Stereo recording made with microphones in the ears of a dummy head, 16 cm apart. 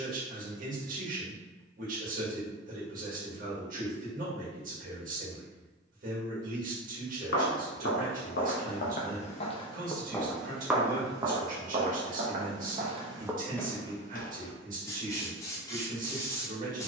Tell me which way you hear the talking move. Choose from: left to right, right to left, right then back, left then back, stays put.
stays put.